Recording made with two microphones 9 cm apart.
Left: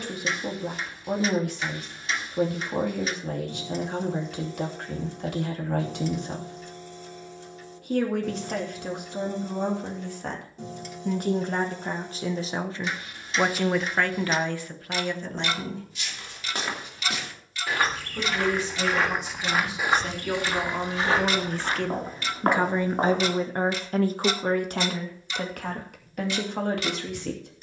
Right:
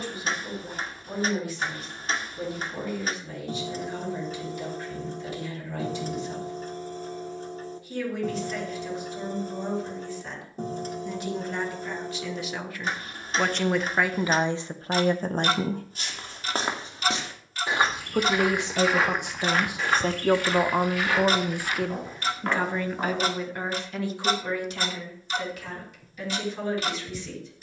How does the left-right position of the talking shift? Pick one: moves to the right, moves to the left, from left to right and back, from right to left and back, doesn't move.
from left to right and back.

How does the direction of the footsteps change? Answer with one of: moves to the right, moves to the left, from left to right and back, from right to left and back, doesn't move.
moves to the left.